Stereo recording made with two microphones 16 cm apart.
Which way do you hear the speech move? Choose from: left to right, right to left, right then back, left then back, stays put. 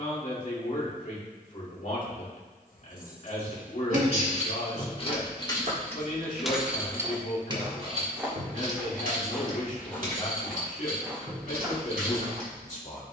stays put.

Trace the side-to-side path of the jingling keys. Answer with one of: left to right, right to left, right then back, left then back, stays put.
left to right.